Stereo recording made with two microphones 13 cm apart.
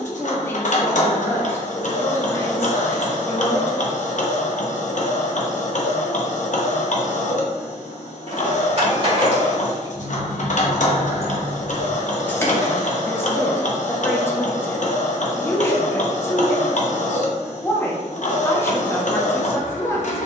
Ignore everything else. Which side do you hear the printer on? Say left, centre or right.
left.